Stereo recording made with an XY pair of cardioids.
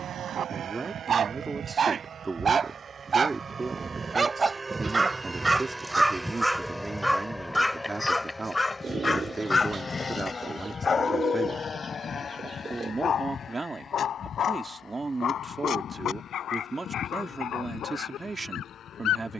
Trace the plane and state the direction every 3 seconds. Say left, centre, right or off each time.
right, right, centre, left, left, left, left.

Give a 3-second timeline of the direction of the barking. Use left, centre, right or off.
right, right, centre, left, left, left, left.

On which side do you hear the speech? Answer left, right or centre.
right.